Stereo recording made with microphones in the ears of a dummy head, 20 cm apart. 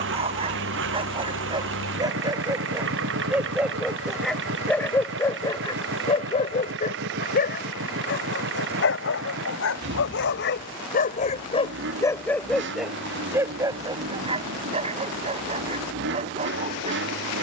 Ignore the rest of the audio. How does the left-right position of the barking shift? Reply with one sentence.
In this clip you hear the barking go left and come back.